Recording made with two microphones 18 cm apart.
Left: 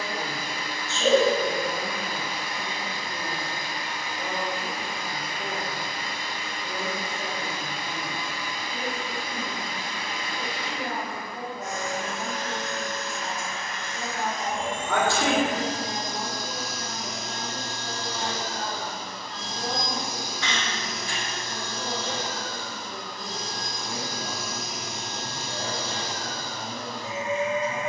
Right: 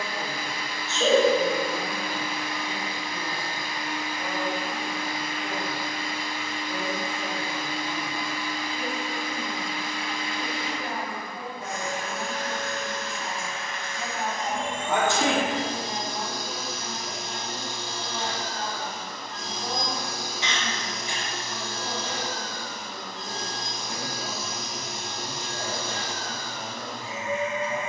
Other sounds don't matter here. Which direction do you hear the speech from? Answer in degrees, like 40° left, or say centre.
30° left.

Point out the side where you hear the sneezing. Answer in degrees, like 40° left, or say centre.
20° right.